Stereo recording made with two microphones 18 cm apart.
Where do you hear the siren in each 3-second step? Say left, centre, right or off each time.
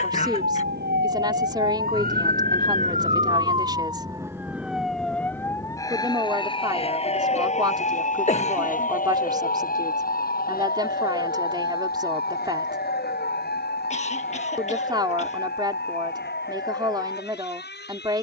right, centre, left, left, left, left.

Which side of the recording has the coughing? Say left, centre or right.
left.